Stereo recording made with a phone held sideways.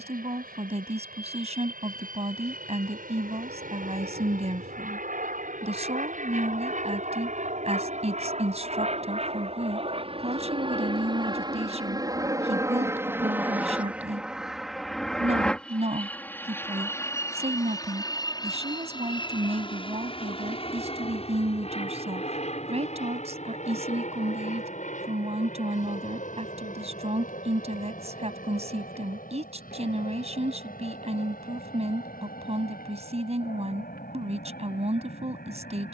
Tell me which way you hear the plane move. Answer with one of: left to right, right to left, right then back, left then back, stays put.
right to left.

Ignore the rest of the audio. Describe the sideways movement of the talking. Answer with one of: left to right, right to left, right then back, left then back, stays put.
stays put.